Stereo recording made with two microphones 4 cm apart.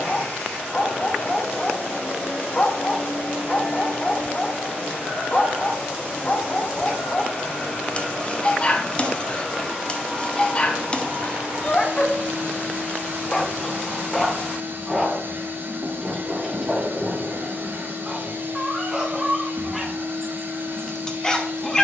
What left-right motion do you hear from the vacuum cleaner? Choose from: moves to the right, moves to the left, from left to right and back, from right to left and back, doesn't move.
moves to the right.